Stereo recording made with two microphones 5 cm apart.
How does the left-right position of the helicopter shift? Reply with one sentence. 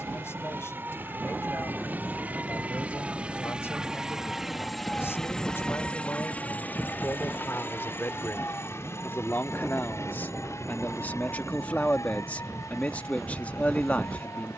You can hear the helicopter go from the right side to the left.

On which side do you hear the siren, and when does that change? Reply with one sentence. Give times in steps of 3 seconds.
You can hear the siren on the right from 0 s, in the centre from 3 s and on the left from 6 s.